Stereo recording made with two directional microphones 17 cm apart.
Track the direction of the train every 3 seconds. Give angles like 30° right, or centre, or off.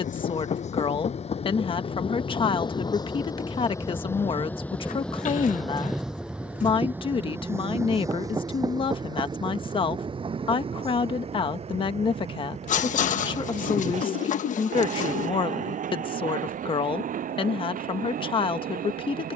40° left, 10° left, 10° right, 30° right, 40° right, 50° right, 50° right.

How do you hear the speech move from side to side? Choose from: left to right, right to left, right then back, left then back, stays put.
stays put.